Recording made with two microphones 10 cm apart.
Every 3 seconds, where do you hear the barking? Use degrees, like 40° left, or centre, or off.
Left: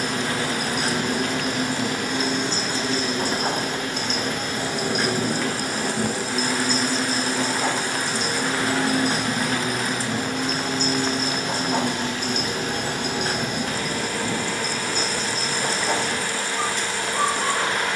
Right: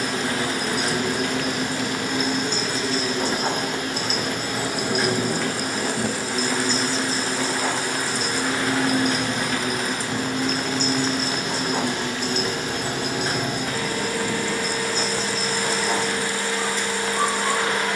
40° left, centre, 20° left, 40° left, 50° left, 60° left.